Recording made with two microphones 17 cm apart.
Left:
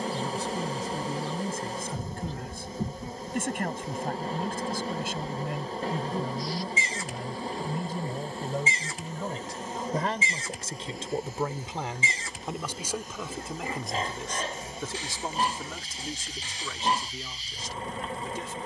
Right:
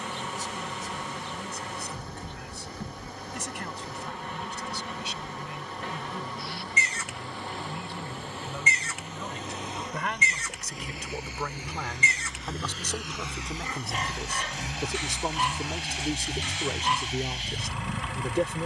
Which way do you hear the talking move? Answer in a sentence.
In this clip you hear the talking move to the right.